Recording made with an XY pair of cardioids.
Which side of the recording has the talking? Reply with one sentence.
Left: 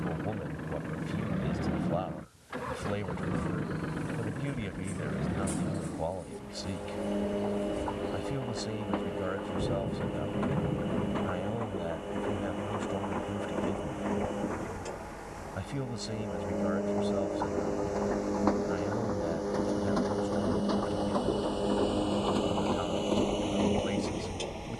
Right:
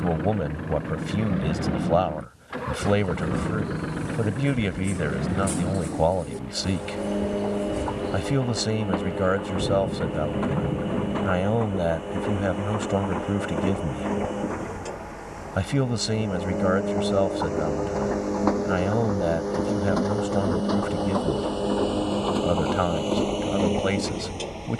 In this clip you hear the talking on the right.